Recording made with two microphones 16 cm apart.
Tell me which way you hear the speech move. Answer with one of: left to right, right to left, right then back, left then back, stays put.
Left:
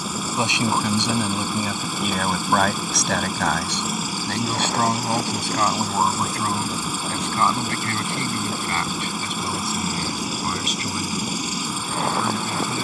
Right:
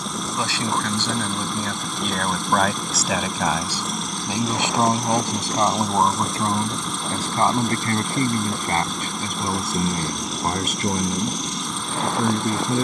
left to right.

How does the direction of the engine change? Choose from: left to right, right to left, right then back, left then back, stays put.
stays put.